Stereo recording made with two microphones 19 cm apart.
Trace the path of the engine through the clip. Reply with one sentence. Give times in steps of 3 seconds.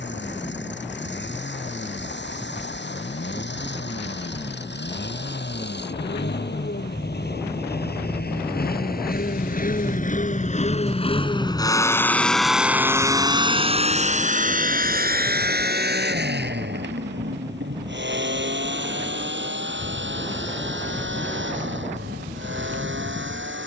You can hear the engine on the left from 0 s and on the right from 12 s.